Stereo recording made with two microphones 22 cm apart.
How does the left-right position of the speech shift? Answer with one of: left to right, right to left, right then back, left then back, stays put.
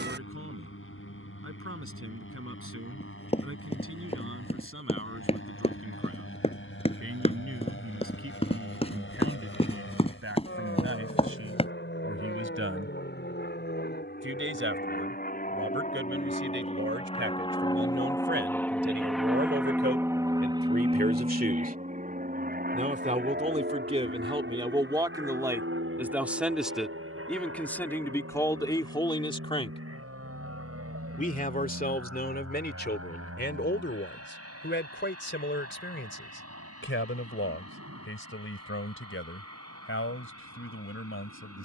right to left.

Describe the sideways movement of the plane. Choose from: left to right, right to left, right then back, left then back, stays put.
left to right.